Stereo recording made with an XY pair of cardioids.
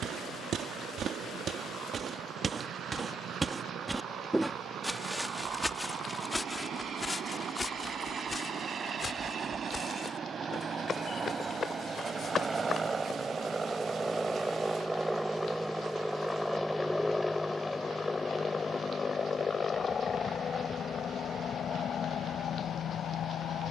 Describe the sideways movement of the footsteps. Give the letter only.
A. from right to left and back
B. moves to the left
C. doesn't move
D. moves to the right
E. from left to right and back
B.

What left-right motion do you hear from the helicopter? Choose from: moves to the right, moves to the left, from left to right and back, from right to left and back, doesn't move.
moves to the left.